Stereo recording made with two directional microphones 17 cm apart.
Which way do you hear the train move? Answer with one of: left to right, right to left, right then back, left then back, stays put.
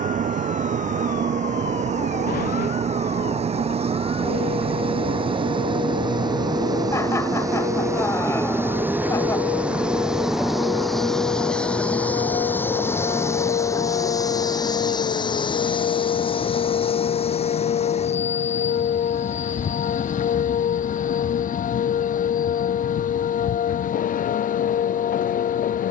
right to left.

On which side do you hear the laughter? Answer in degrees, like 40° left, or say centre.
20° left.